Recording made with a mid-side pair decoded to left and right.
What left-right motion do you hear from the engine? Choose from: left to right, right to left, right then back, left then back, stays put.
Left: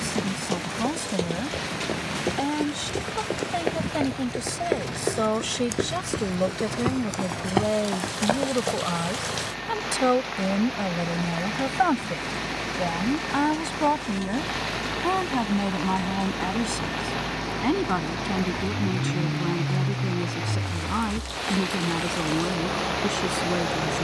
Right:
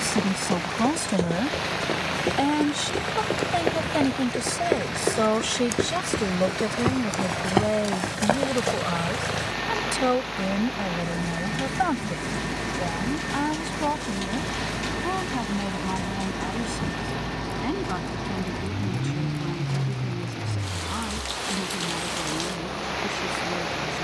right to left.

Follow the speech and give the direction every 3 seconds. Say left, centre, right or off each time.
right, right, centre, left, left, left, left, left.